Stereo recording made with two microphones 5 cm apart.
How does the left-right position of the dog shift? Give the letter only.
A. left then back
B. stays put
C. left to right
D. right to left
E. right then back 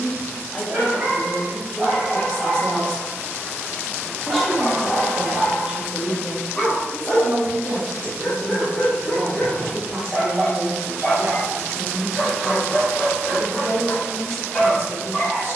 D.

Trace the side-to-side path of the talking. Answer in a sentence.
You can hear the talking travel towards the right.